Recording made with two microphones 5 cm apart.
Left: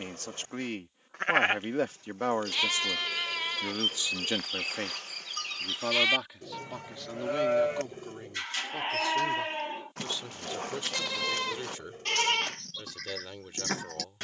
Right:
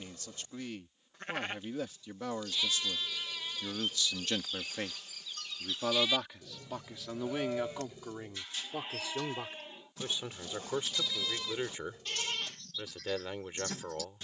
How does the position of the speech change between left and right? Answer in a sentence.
You can hear the speech travel towards the right.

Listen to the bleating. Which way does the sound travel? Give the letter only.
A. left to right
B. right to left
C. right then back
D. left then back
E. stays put
E.